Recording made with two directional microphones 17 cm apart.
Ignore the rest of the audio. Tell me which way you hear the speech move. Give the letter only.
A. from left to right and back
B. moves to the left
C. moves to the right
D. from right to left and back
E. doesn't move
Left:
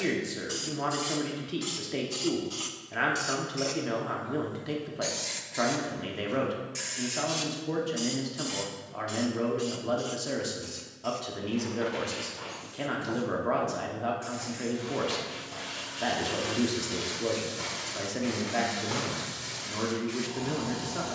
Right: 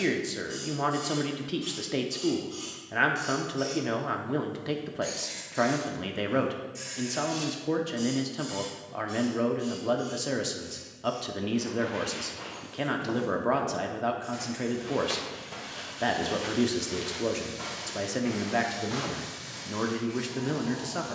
E.